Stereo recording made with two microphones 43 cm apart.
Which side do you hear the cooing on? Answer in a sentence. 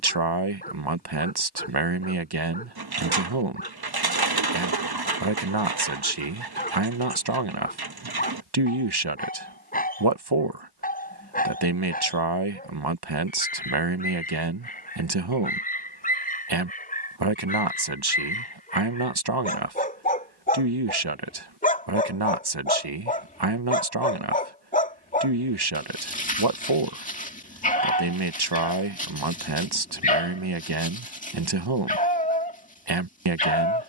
In this clip you hear the cooing on the right.